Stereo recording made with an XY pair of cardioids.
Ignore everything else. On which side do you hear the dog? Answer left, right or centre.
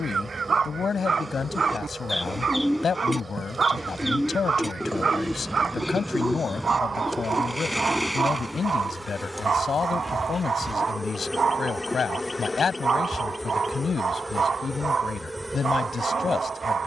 right.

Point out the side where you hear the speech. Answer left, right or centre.
left.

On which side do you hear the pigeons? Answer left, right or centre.
centre.